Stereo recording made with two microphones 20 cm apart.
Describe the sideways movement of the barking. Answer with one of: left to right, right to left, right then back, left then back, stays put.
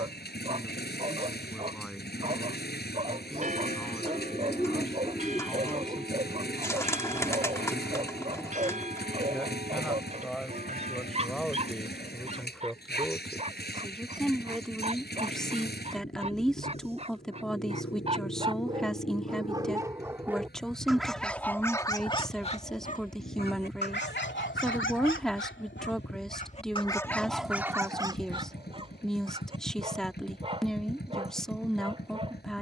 left then back.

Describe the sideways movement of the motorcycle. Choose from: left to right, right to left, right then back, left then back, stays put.
stays put.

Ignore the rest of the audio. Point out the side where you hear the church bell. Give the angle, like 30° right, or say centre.
40° right.